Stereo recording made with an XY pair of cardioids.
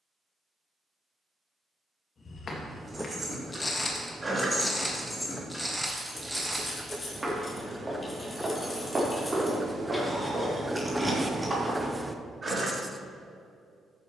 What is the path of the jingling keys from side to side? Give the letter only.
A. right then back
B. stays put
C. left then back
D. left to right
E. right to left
C.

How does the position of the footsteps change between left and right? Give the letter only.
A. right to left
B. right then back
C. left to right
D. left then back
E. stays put
C.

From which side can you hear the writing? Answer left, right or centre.
centre.